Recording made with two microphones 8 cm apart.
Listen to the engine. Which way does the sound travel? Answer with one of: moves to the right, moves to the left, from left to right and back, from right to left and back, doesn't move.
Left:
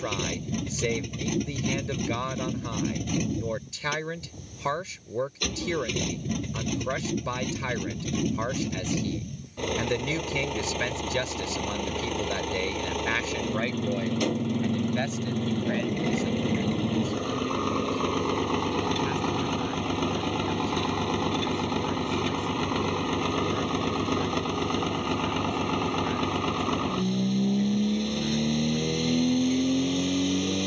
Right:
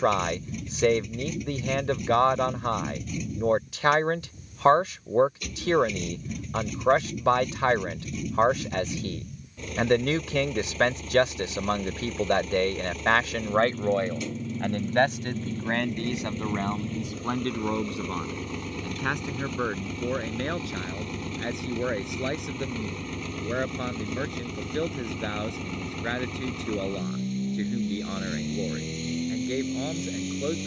doesn't move.